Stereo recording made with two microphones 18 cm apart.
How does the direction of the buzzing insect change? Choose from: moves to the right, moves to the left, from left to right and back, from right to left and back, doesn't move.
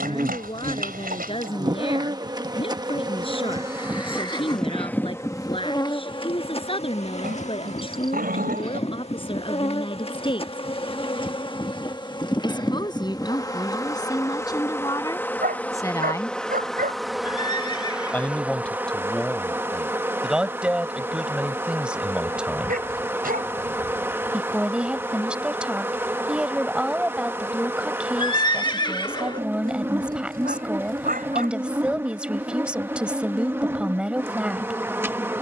from right to left and back.